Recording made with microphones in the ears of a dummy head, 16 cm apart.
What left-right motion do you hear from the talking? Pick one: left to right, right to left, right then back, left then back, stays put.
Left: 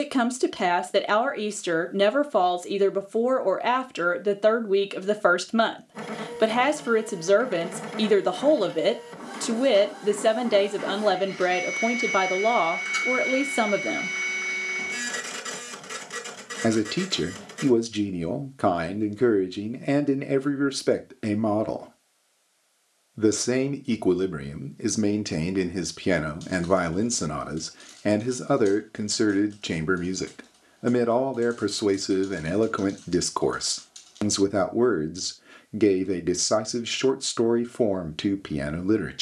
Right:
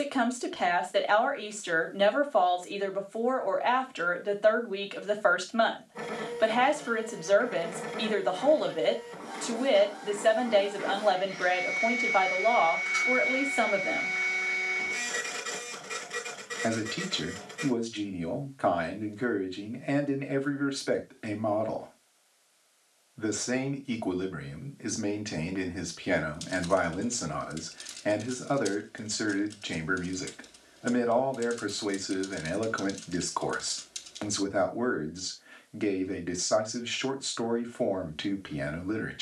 stays put.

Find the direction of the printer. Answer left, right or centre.
left.